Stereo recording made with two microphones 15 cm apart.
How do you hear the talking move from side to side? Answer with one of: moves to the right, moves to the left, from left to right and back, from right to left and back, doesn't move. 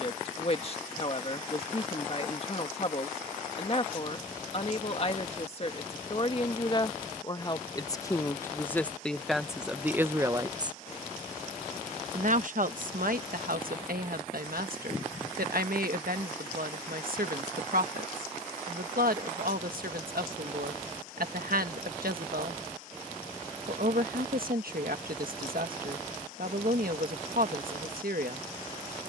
moves to the right.